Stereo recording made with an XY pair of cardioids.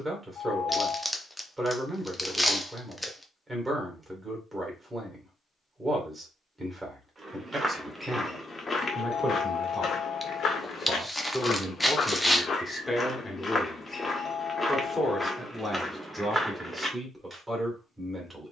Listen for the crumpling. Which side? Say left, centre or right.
centre.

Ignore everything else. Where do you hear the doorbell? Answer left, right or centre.
left.